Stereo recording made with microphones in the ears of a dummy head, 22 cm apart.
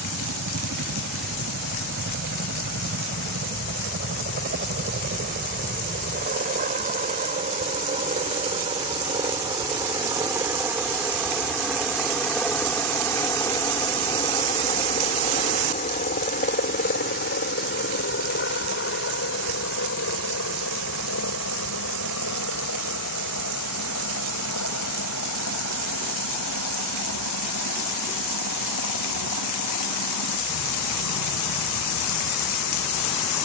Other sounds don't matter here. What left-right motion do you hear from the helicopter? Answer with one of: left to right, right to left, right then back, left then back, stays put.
right to left.